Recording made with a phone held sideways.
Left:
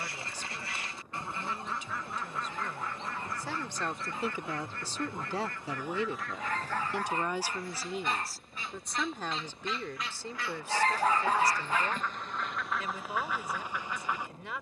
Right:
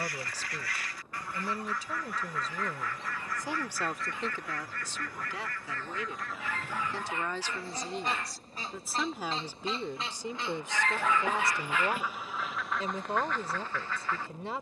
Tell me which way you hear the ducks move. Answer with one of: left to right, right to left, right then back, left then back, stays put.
right then back.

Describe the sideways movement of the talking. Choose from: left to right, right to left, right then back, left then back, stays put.
left then back.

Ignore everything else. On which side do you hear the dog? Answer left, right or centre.
left.